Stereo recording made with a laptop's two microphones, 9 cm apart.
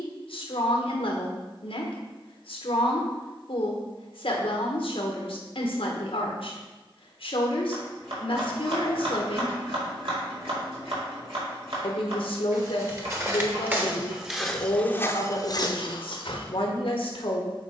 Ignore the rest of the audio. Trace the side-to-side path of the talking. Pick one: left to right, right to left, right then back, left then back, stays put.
stays put.